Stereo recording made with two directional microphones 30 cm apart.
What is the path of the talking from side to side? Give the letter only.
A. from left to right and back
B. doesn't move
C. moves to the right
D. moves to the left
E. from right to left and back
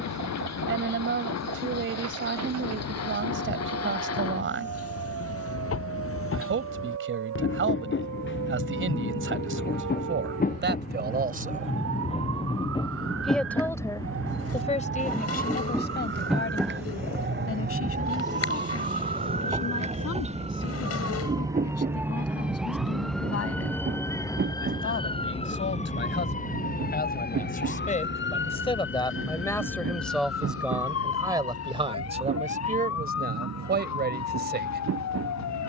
E.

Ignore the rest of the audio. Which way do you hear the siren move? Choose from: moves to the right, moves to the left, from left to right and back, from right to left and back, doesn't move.
moves to the left.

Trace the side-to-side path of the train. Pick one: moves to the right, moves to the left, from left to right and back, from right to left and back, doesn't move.
moves to the right.